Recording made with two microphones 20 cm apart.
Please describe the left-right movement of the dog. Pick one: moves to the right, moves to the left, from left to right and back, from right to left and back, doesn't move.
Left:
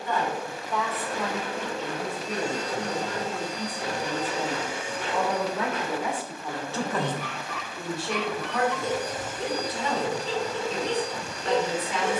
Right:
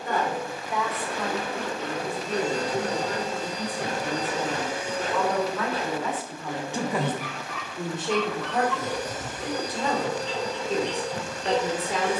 moves to the left.